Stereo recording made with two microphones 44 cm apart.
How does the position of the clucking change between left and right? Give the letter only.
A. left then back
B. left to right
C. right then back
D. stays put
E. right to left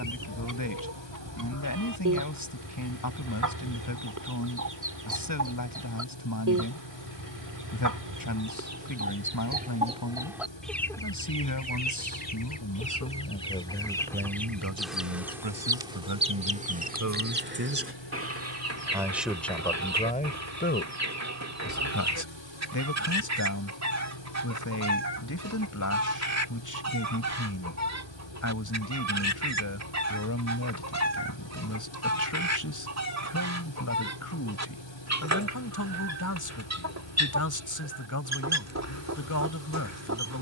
A.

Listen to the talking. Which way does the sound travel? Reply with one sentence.
You can hear the talking go right and come back.